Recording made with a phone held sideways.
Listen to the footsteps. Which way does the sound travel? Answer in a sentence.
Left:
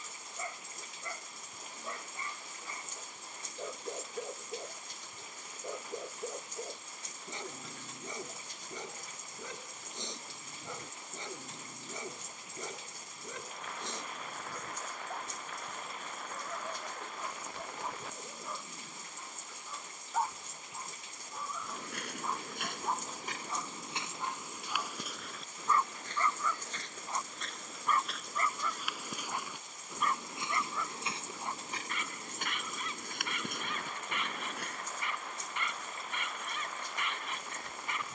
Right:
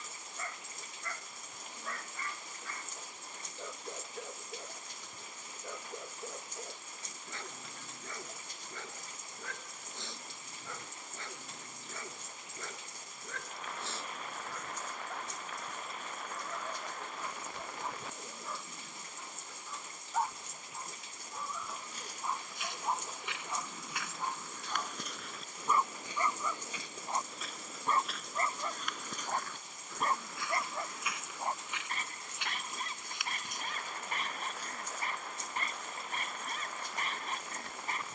In this clip you hear the footsteps move from left to right and back again.